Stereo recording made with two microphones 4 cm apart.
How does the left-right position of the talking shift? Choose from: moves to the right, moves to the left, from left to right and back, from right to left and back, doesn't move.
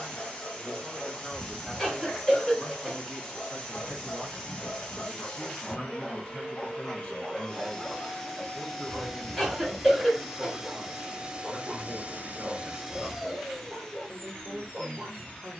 from right to left and back.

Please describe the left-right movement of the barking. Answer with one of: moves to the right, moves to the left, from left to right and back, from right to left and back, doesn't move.
moves to the right.